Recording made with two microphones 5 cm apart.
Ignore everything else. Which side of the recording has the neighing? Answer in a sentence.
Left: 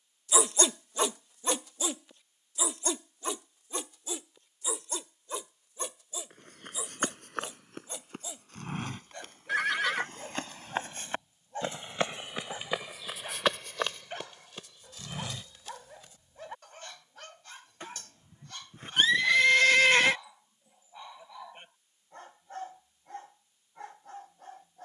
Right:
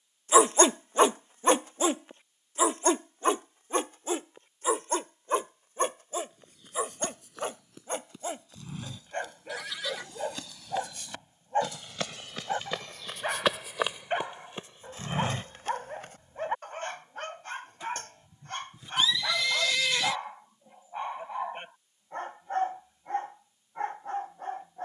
In this clip you hear the neighing on the left.